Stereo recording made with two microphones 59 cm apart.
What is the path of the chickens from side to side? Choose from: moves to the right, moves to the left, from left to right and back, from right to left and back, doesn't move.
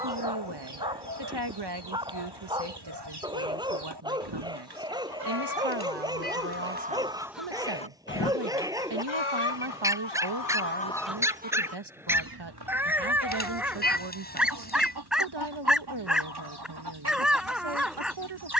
from right to left and back.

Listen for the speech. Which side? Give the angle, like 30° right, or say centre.
40° right.